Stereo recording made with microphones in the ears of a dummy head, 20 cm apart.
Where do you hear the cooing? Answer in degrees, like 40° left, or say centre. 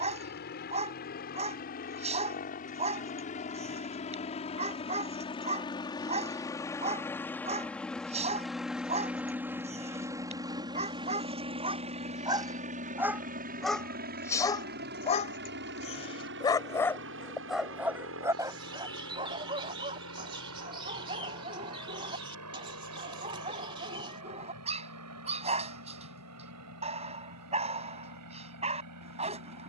20° right.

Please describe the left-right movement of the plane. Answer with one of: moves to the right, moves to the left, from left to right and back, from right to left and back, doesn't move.
moves to the right.